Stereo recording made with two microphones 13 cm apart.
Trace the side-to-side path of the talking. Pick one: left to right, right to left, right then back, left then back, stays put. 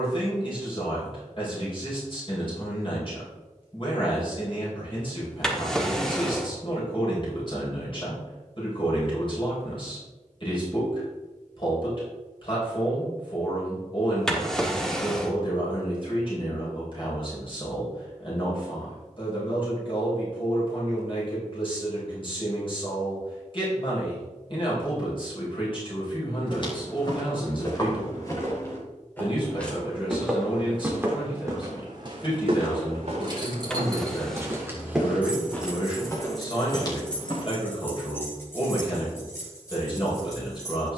stays put.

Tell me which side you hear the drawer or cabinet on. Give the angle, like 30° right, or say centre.
centre.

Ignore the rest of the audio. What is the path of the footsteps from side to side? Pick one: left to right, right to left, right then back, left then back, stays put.
right then back.